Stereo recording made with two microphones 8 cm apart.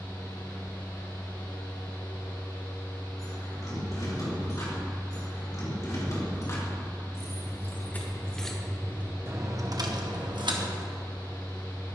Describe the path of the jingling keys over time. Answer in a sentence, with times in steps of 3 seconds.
In this clip you hear the jingling keys not at all from 0 s, on the left from 3 s and on the right from 9 s.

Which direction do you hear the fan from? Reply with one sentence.
You can hear the fan on the left.